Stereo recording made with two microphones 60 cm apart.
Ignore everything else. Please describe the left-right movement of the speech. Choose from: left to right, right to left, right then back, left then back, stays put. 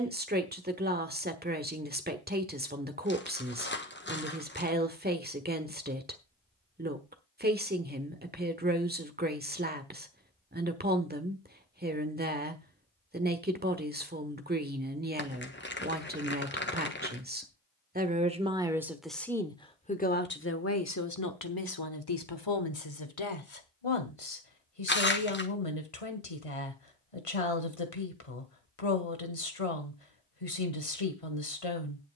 right to left.